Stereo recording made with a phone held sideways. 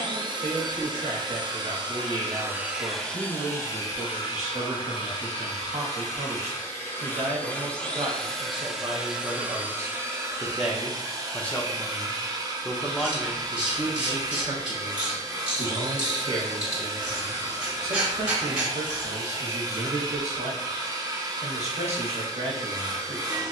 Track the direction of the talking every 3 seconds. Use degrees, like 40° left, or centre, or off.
60° right, 60° right, 50° right, 10° right, 10° right, 50° right, 50° right, 50° right.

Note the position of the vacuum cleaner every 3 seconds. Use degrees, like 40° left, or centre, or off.
30° right, 30° left, 10° left, 20° right, 30° right, 30° right, 30° right, 30° right.